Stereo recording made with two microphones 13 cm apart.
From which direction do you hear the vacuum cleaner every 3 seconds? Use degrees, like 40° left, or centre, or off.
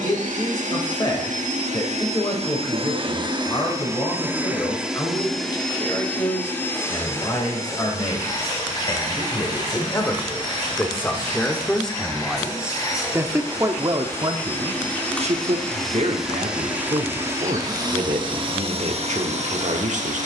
70° right, 10° right, 20° left, 30° left, 20° left, 10° right, 50° right.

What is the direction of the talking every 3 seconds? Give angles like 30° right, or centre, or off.
30° left, 30° left, 30° left, 20° left, 20° right, 60° right, 70° right.